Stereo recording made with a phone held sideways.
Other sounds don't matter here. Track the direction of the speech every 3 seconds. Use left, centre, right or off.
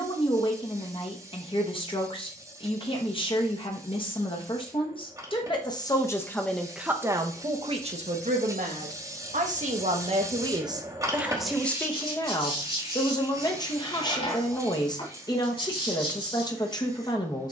left, left, right, right, left, left.